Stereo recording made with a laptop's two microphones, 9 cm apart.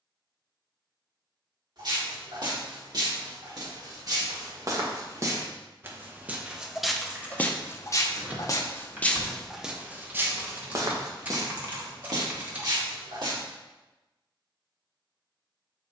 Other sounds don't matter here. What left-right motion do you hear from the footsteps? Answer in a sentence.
In this clip you hear the footsteps go left and come back.